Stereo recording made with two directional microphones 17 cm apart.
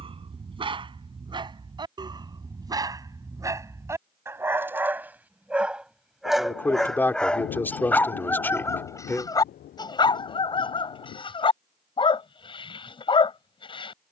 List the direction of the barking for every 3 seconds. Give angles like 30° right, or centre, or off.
30° right, 10° right, 10° left, 30° left, 30° left.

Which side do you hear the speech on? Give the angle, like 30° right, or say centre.
10° left.